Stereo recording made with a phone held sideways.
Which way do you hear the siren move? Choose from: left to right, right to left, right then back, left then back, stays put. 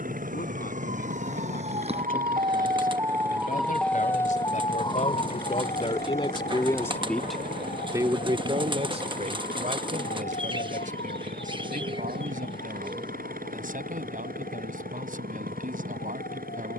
right to left.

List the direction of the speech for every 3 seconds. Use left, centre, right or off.
left, left, centre, right, right, right.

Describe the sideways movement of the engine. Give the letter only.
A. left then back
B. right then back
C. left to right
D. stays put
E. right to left
D.